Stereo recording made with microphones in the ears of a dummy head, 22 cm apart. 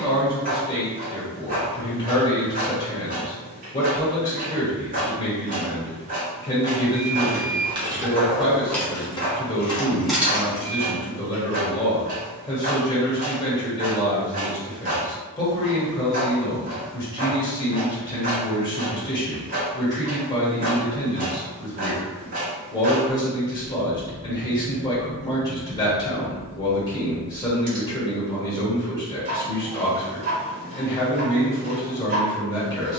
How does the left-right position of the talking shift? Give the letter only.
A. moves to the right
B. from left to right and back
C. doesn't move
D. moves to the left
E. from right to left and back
C.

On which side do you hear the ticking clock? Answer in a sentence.
In this clip you hear the ticking clock on the right.